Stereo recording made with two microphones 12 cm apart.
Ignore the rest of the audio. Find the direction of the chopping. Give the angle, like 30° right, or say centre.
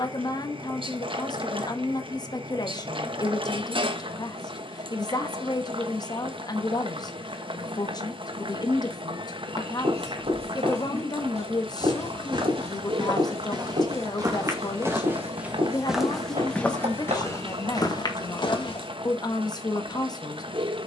80° right.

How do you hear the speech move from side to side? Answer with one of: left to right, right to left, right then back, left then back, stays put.
stays put.